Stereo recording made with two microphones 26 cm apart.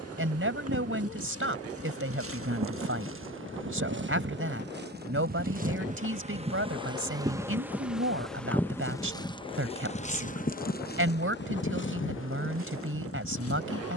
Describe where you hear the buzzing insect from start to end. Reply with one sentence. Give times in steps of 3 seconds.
In this clip you hear the buzzing insect on the right from 0 s, in the centre from 6 s and on the left from 9 s.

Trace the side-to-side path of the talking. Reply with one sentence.
In this clip you hear the talking stay in one place.